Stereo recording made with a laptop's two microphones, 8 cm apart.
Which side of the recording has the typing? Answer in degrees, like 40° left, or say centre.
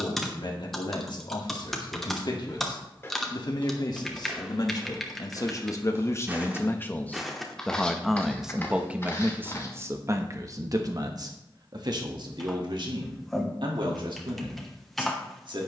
centre.